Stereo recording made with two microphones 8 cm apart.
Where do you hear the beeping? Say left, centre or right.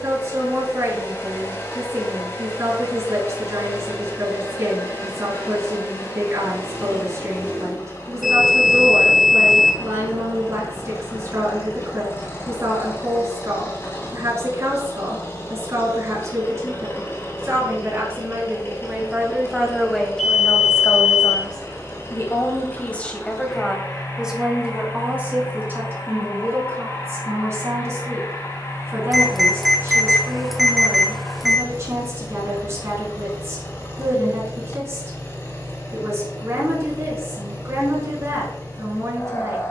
centre.